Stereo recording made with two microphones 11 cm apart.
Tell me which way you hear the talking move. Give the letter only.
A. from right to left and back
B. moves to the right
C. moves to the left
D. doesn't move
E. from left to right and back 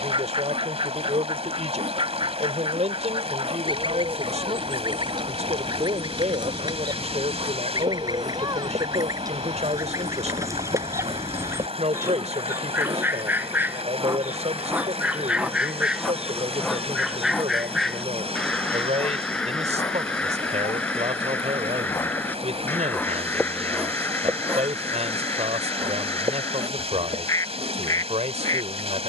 D.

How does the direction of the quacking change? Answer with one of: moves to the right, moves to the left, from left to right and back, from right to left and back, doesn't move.
moves to the left.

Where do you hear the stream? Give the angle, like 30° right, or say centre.
60° right.